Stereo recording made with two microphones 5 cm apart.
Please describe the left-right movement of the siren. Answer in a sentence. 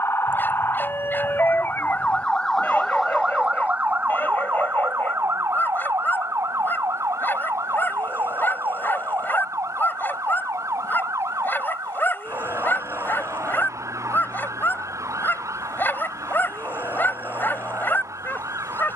In this clip you hear the siren move to the right.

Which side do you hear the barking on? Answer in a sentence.
In this clip you hear the barking on the left.